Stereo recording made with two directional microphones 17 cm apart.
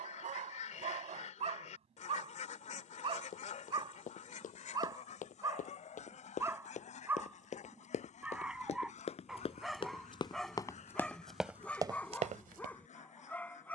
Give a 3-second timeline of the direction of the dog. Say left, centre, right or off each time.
right, right, centre, centre, centre.